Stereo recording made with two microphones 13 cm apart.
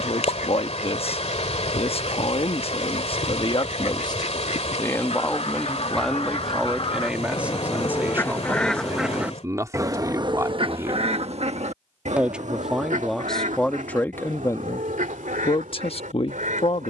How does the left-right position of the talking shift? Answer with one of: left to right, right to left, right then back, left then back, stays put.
right then back.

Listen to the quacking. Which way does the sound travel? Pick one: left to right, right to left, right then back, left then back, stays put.
left to right.